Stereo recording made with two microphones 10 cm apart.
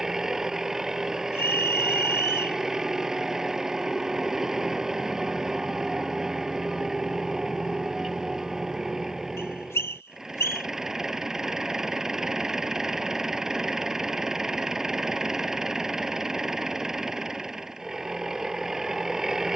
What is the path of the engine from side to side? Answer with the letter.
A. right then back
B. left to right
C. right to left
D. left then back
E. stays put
E.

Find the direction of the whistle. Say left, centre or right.
left.